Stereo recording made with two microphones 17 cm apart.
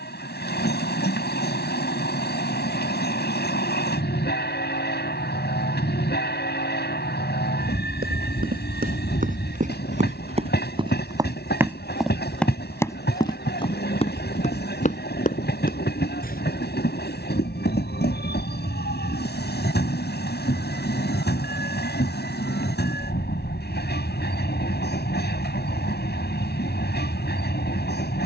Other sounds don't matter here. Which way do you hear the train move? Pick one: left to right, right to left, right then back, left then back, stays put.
stays put.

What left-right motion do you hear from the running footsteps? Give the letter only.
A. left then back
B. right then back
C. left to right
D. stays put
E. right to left
E.